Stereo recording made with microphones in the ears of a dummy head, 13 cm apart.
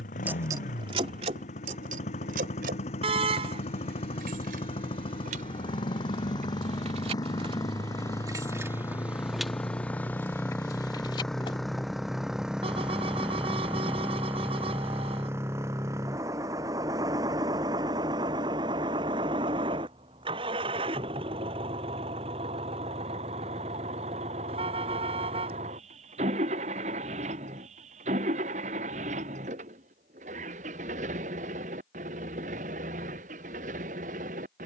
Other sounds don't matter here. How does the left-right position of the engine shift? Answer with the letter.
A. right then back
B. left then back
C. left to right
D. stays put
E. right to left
C.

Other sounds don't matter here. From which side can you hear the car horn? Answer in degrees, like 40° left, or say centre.
40° right.